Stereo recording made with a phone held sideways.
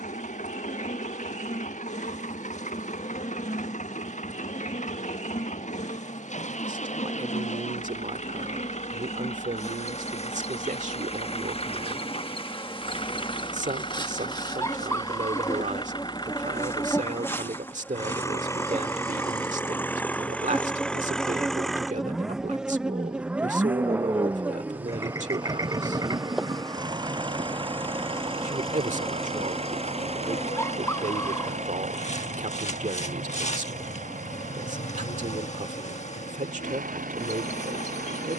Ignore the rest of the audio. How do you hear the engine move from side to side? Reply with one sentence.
You can hear the engine move from left to right.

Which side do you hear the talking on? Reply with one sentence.
You can hear the talking on the right.